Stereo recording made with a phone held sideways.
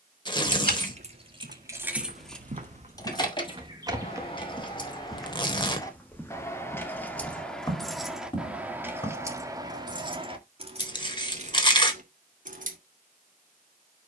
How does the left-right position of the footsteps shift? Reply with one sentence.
In this clip you hear the footsteps travel towards the left.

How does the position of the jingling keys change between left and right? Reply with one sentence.
You can hear the jingling keys move from right to left and back again.